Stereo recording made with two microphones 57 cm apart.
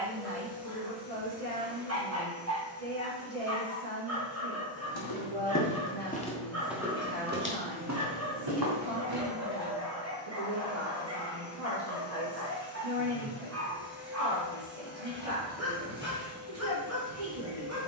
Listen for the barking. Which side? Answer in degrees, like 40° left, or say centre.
30° right.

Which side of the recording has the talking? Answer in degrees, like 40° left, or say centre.
70° right.